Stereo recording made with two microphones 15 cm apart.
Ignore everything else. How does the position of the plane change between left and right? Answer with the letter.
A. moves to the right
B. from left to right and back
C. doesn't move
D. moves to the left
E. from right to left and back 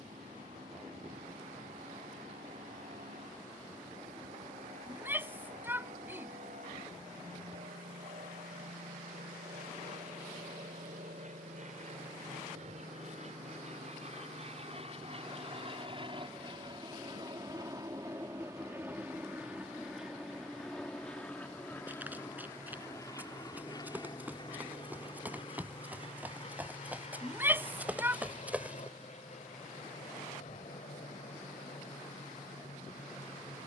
D.